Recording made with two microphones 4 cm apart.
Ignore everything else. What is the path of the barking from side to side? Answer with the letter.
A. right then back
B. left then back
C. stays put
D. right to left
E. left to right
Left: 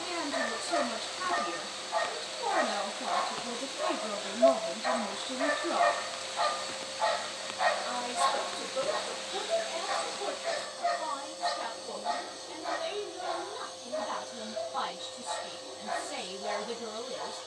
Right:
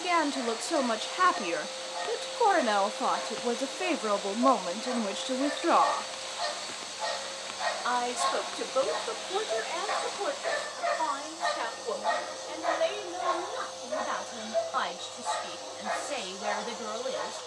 E.